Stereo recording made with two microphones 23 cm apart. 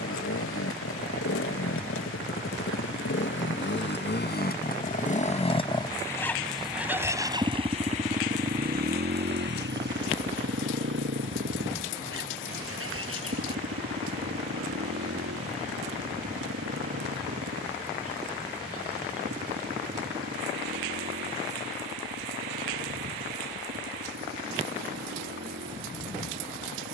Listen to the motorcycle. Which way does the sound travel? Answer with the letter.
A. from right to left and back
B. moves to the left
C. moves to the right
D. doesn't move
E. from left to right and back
C.